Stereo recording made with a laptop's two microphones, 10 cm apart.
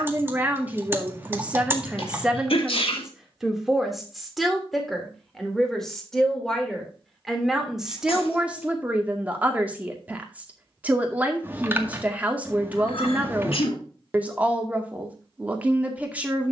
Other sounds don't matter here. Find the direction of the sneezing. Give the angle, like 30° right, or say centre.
70° left.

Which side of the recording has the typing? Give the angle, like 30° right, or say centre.
20° right.